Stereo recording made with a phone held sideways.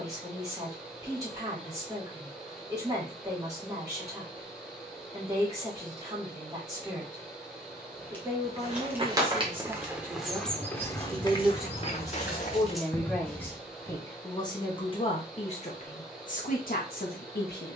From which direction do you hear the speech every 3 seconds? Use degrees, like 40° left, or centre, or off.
20° right, 20° right, 20° right, 10° right, 10° left, 50° left.